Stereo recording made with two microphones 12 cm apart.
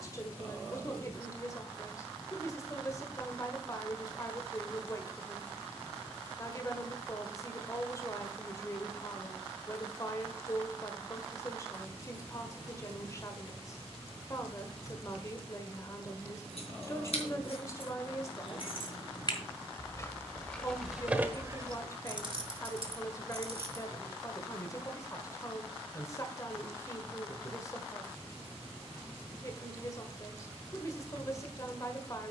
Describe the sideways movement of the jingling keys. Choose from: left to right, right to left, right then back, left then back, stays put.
left to right.